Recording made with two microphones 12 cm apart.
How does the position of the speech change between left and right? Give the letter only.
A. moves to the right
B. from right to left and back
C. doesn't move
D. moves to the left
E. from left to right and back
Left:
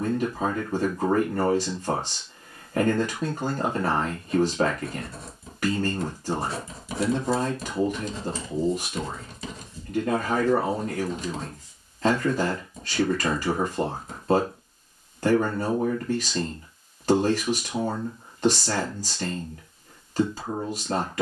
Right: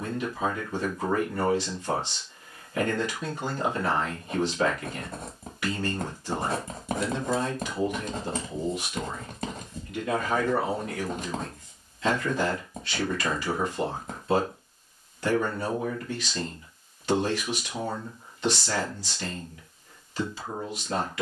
C.